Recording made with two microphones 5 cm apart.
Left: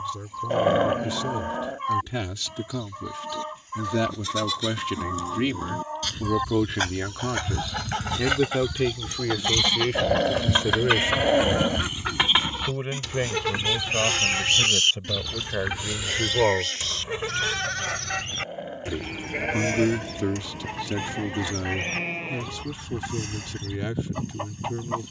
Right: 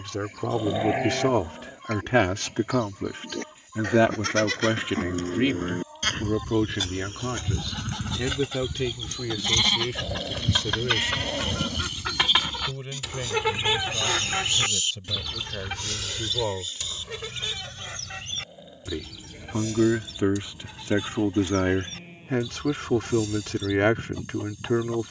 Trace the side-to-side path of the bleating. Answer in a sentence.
You can hear the bleating move from right to left.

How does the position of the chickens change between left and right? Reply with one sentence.
In this clip you hear the chickens move from left to right and back again.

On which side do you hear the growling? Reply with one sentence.
You can hear the growling on the left.